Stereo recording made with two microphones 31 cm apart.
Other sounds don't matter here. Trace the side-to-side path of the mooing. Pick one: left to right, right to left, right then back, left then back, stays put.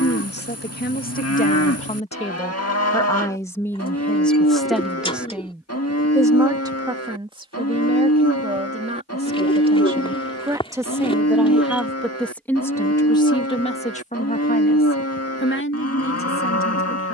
stays put.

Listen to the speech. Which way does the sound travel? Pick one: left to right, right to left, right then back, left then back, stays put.
right then back.